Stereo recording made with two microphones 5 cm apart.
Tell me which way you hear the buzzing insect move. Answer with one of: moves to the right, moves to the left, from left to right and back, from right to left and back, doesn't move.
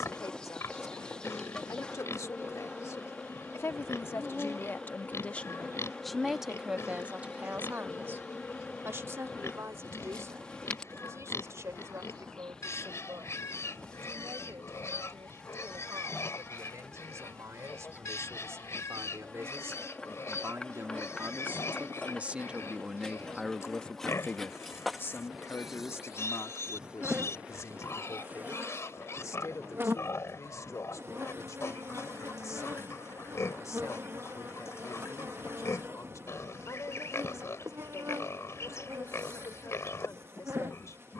moves to the right.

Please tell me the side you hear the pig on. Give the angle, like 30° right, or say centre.
60° left.